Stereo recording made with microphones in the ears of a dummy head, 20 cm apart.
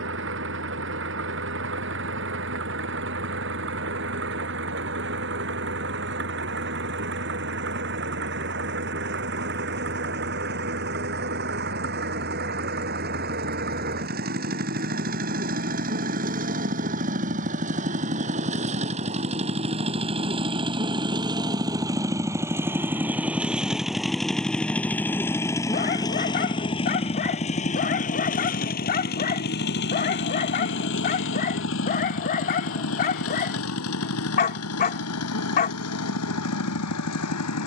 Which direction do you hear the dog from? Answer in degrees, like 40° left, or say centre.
40° left.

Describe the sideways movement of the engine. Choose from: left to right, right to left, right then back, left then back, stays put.
right to left.